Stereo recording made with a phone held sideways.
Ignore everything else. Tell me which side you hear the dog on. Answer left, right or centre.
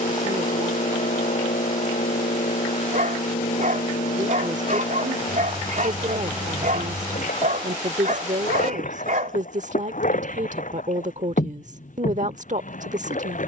right.